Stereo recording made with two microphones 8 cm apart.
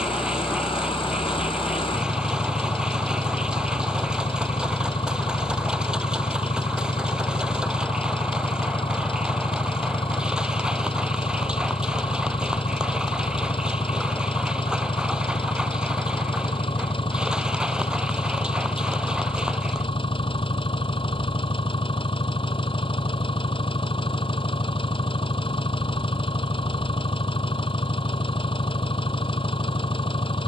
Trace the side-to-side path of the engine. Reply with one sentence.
In this clip you hear the engine stay in one place.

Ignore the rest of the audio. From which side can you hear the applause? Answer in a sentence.
In this clip you hear the applause in the centre.